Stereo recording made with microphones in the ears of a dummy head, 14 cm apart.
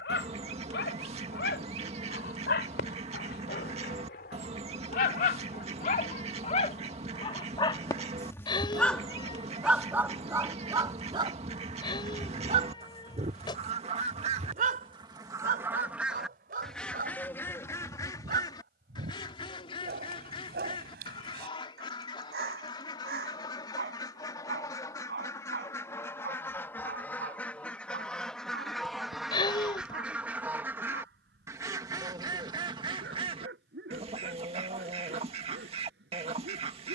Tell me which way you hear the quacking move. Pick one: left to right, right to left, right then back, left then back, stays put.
left then back.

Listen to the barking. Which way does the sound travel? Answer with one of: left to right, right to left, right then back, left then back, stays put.
left to right.